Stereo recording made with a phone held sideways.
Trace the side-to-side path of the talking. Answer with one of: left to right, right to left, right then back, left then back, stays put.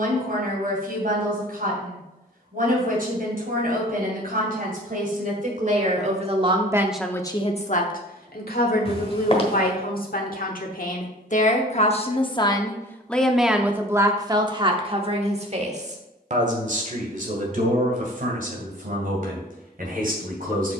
left then back.